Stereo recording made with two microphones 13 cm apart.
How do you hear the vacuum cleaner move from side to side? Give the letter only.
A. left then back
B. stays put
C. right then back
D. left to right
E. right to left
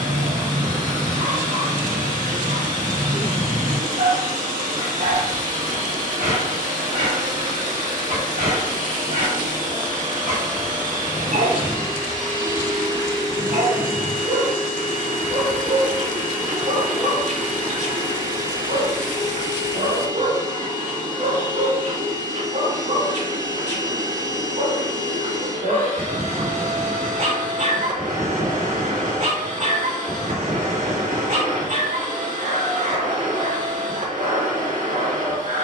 B.